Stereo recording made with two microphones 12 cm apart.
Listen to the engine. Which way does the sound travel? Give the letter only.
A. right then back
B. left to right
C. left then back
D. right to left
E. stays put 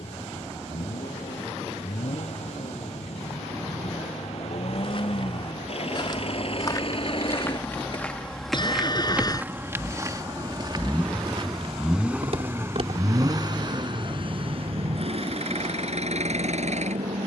B.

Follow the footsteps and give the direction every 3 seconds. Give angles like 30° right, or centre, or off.
off, 50° left, 20° left, 30° right, 60° right, off.